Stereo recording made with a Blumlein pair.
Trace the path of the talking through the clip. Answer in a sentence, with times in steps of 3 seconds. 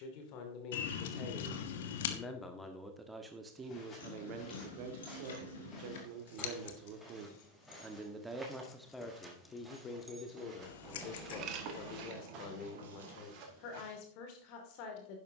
You can hear the talking on the left from 0 s, on the right from 3 s and on the left from 9 s.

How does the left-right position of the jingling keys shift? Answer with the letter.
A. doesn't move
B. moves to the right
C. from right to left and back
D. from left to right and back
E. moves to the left
B.